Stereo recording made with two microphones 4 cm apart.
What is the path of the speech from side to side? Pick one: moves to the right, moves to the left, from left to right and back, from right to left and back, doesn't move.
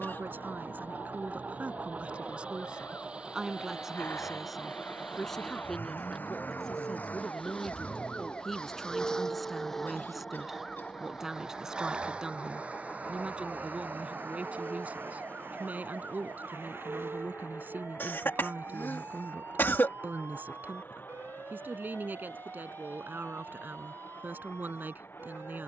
from right to left and back.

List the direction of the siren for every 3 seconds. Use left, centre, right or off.
left, left, left, centre, right, right, right, right, right.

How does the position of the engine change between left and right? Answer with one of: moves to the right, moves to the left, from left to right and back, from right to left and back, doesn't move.
moves to the left.